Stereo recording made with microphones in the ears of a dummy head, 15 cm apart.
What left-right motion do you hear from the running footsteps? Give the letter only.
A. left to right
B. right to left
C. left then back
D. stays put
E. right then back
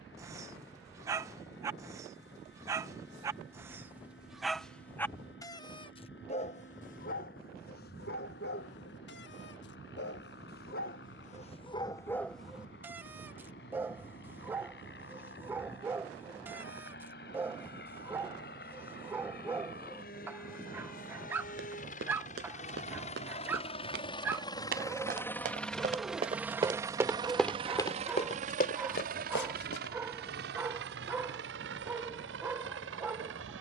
B.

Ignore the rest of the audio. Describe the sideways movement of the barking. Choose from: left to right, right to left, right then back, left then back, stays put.
left then back.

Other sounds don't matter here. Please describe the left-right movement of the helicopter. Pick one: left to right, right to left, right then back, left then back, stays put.
left to right.